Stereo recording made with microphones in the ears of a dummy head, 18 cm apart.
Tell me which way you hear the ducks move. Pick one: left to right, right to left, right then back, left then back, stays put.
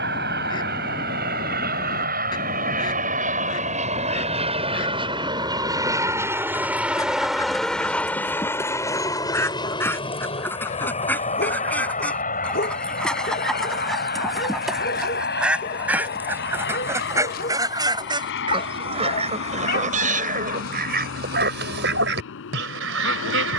left to right.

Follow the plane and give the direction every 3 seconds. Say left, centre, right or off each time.
right, right, centre, left, left, left, left, left.